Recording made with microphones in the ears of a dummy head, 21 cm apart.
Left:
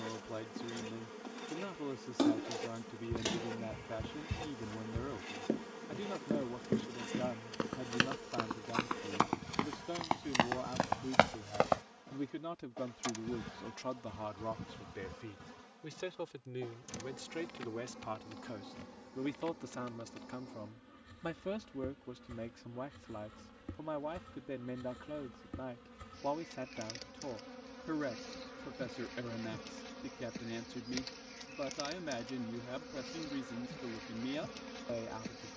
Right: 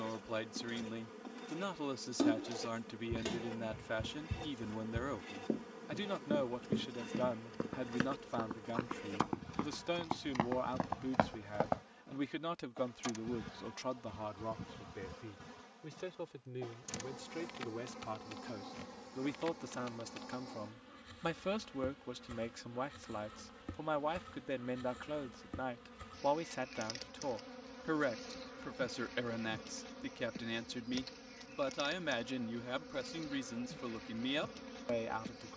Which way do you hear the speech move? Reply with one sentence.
In this clip you hear the speech go left and come back.